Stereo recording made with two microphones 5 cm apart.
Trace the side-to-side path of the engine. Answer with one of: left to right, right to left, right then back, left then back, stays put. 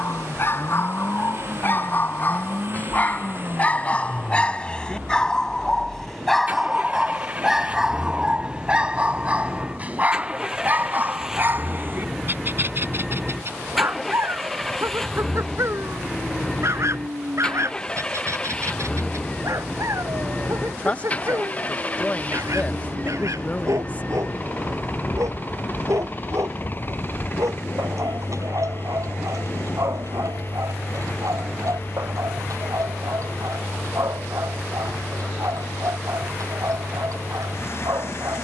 right to left.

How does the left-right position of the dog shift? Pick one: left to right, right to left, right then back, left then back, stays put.
left to right.